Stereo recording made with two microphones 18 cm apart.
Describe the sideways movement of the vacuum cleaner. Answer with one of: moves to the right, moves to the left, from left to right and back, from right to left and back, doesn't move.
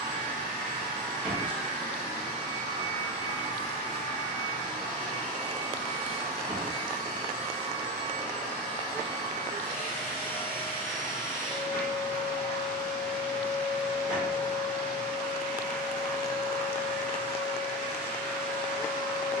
doesn't move.